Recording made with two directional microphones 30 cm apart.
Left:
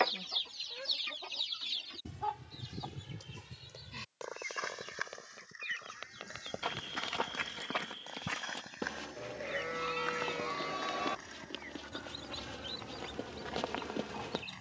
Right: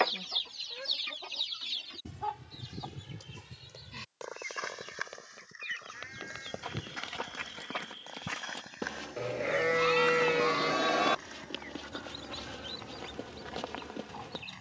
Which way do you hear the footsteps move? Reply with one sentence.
In this clip you hear the footsteps move from left to right and back again.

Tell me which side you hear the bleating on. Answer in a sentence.
You can hear the bleating on the right.